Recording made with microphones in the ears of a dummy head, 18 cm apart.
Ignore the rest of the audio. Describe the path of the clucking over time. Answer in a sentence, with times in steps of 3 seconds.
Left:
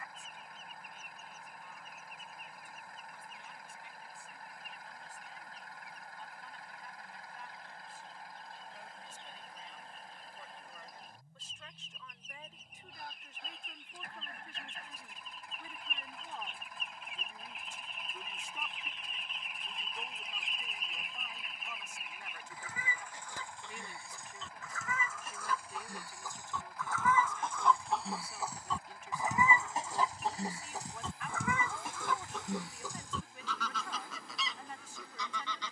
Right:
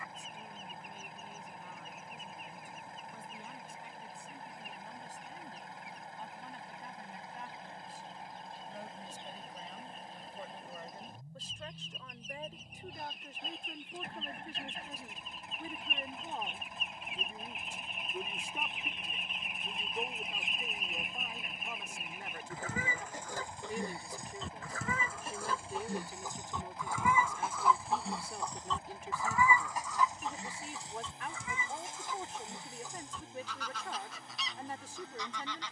You can hear the clucking on the right from 0 s, in the centre from 27 s and on the left from 30 s.